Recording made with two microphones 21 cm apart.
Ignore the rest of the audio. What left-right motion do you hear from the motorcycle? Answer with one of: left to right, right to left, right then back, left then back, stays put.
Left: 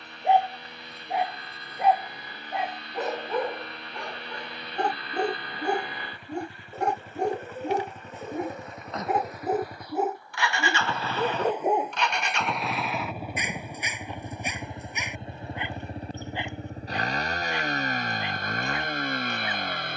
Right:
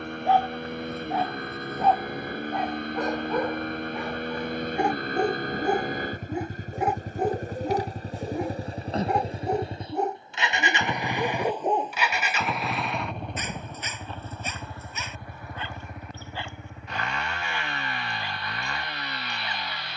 right to left.